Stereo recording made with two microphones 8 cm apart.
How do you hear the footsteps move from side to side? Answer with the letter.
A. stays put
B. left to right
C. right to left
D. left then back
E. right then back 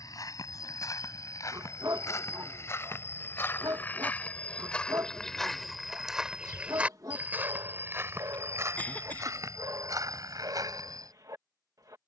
B.